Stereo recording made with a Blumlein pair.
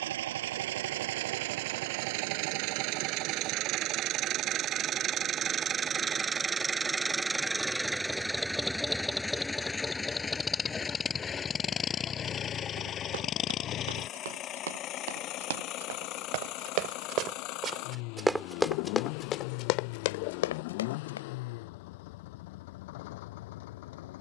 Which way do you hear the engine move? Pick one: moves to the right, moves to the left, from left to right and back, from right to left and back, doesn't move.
moves to the left.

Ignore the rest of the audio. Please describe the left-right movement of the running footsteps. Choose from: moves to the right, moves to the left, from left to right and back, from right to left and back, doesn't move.
moves to the left.